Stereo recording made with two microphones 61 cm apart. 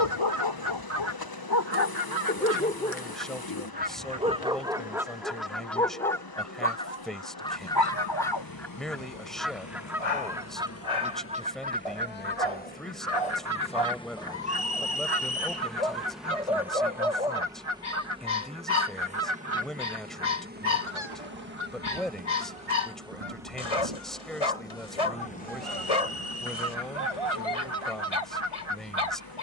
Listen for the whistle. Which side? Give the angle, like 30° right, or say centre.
10° right.